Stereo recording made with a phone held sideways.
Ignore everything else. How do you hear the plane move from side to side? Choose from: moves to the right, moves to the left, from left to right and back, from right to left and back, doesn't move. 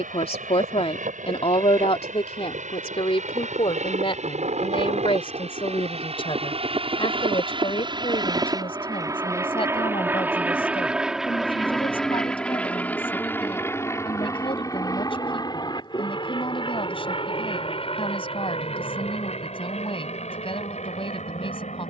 moves to the left.